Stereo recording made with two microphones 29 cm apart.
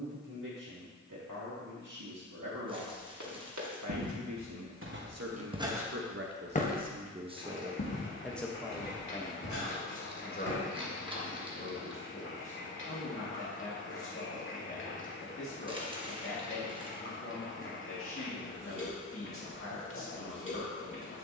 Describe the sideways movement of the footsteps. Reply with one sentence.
In this clip you hear the footsteps move from right to left.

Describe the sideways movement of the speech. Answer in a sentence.
In this clip you hear the speech move to the left.